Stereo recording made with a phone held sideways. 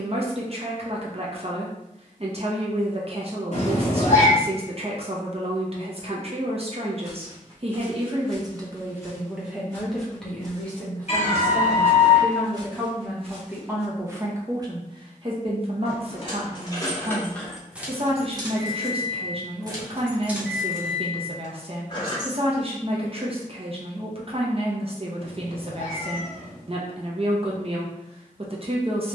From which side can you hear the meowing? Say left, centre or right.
left.